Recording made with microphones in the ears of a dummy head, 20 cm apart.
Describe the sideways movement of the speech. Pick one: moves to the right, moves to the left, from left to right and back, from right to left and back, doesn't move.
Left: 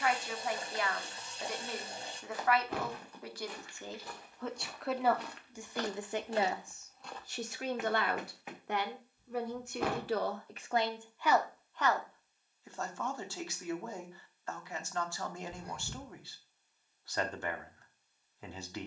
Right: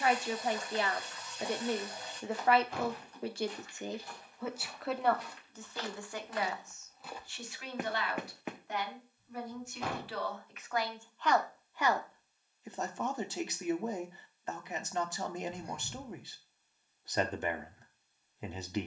from right to left and back.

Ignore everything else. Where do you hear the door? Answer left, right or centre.
left.